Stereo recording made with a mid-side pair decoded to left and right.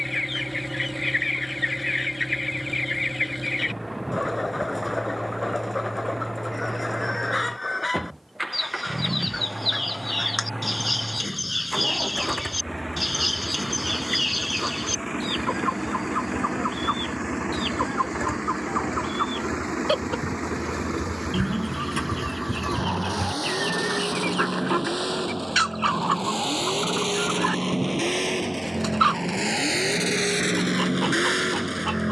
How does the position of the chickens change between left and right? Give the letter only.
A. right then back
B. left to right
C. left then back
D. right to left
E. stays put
B.